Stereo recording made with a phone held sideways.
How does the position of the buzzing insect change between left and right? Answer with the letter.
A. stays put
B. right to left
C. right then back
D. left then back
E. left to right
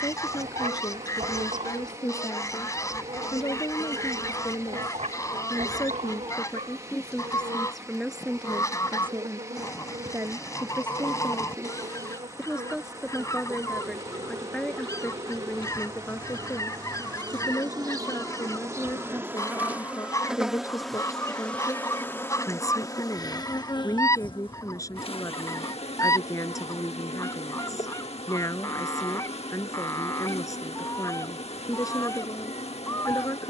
B.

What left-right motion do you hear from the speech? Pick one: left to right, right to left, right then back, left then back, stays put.
right then back.